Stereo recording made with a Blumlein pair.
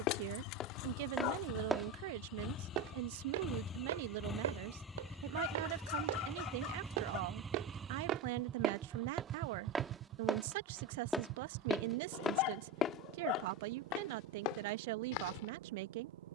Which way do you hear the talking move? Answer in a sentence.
You can hear the talking stay put.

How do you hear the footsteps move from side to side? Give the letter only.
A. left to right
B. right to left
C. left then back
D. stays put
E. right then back
E.